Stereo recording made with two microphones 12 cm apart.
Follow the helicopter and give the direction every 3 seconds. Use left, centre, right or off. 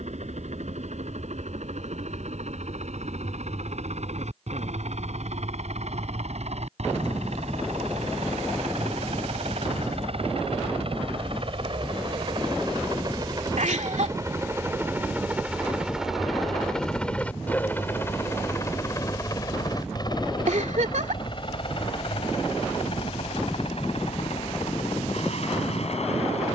right, right, right, right, right, centre, left, left, left.